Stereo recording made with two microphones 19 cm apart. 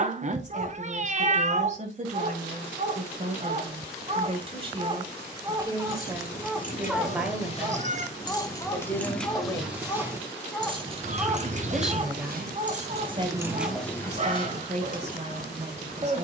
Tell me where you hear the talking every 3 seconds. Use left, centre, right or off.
right, right, centre, centre, right, right.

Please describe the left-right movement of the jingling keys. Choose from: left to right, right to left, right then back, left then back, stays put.
right then back.